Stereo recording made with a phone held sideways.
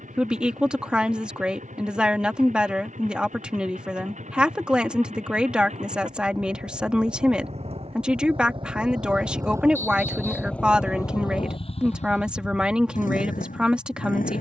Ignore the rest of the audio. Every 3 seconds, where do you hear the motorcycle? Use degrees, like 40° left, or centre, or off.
70° right, 60° right, 50° right, 10° left, 70° left.